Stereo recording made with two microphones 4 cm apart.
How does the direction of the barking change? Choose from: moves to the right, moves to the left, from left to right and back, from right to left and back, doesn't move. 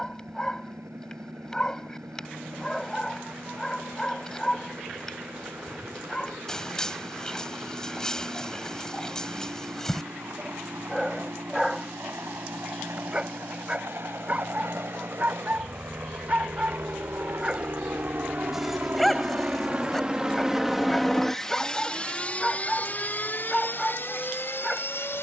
from left to right and back.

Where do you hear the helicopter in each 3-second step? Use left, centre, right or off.
right, right, right, right, right, right, right, left, left.